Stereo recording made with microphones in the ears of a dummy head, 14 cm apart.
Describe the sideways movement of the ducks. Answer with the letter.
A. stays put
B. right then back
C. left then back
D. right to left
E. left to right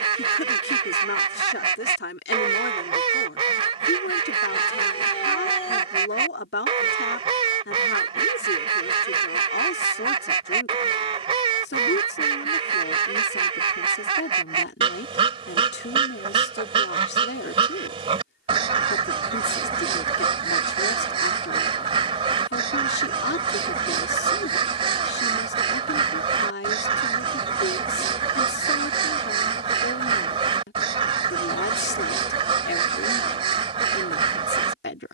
A.